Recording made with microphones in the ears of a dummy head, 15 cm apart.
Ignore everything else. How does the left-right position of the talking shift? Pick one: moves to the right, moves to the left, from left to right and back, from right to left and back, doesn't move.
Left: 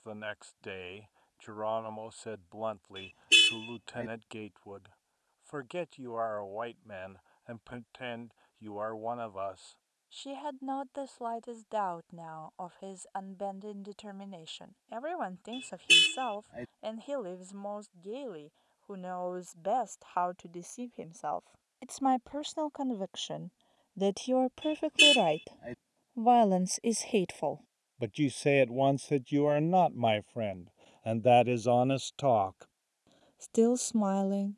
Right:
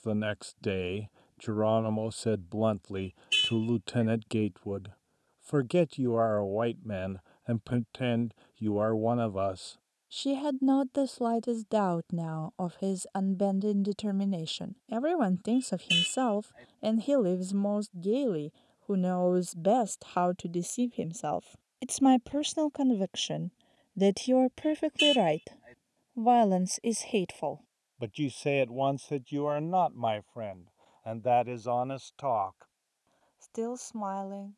moves to the left.